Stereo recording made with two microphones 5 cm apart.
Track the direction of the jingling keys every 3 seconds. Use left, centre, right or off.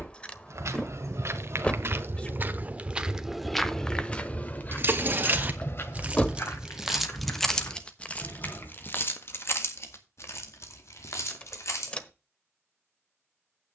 off, right, centre, left, off.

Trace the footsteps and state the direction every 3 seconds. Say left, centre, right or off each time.
right, left, left, off, off.